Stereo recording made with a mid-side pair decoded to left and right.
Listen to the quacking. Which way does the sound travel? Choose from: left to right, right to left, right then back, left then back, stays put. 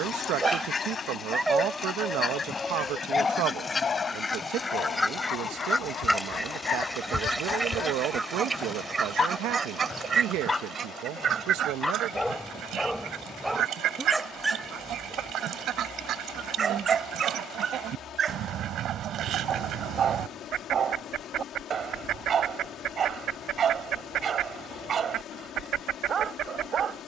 left to right.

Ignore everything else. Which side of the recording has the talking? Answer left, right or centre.
right.